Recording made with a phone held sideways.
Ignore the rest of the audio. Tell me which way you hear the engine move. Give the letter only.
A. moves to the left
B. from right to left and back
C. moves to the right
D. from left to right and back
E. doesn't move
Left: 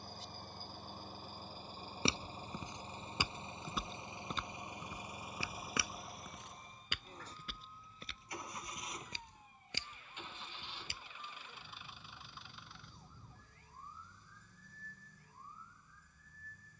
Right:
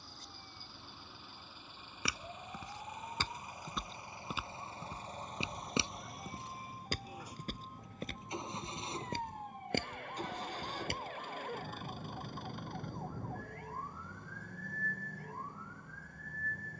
C.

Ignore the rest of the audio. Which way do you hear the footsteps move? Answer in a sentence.
In this clip you hear the footsteps move to the right.